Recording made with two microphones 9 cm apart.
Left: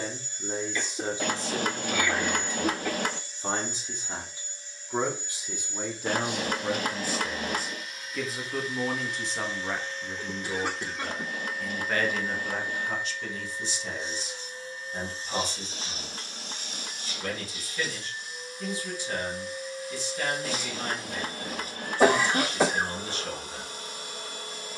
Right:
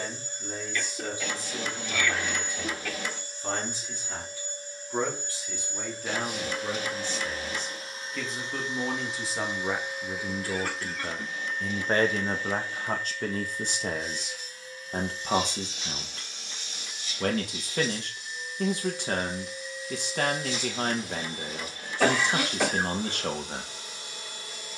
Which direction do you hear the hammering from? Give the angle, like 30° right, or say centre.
60° left.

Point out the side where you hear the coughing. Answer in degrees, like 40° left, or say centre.
20° left.